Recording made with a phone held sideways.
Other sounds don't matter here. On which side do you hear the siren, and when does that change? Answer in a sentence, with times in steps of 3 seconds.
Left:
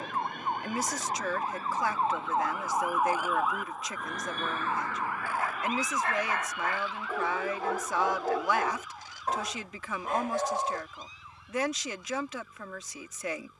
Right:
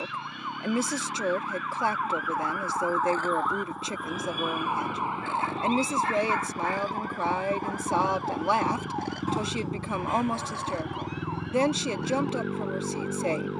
In this clip you hear the siren on the left from 0 s, in the centre from 3 s and on the right from 6 s.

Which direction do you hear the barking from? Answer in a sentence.
In this clip you hear the barking on the left.